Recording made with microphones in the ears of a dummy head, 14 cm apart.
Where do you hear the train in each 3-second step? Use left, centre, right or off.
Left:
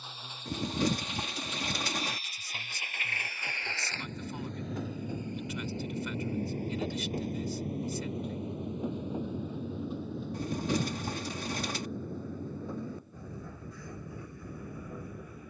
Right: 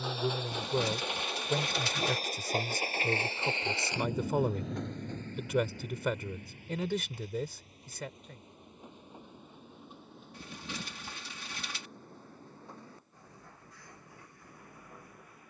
right, centre, left, left, left.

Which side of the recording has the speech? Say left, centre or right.
right.